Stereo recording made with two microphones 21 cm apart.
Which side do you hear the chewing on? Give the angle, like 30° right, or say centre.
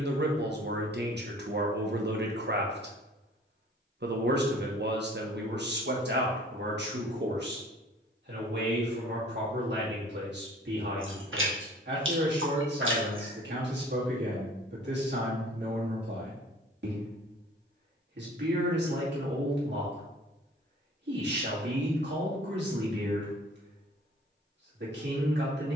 70° right.